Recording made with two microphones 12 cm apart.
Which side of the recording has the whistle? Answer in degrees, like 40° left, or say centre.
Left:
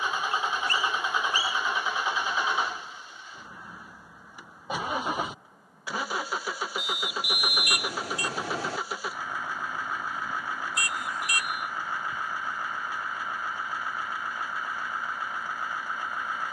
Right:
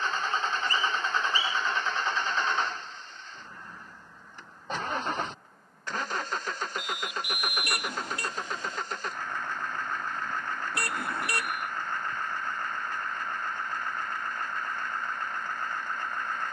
80° left.